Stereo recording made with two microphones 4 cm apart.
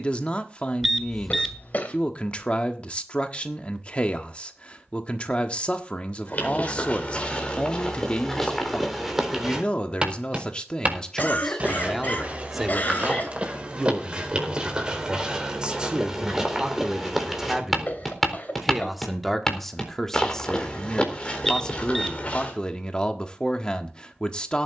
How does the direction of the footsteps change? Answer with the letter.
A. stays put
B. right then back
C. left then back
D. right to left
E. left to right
B.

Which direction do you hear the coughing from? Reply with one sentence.
In this clip you hear the coughing on the left.